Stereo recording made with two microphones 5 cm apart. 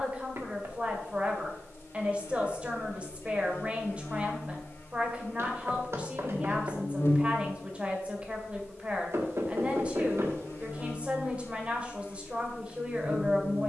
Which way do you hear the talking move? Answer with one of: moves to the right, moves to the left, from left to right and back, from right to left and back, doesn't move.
doesn't move.